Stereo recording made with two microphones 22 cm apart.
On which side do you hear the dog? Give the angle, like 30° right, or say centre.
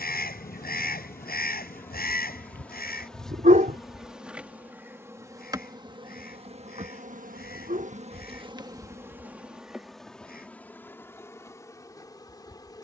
40° right.